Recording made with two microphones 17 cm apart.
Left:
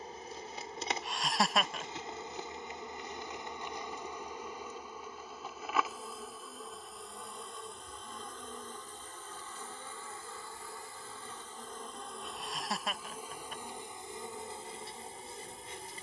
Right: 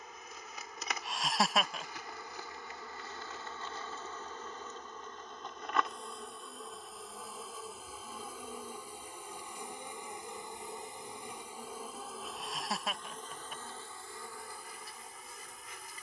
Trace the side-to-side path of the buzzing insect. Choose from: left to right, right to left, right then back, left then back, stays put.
right then back.